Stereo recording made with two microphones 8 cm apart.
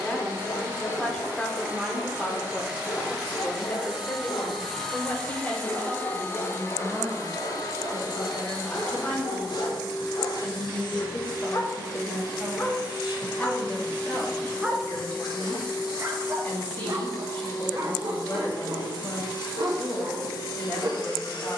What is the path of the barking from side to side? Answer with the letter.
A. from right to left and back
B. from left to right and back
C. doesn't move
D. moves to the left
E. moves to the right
E.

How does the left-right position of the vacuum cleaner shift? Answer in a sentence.
You can hear the vacuum cleaner move to the left.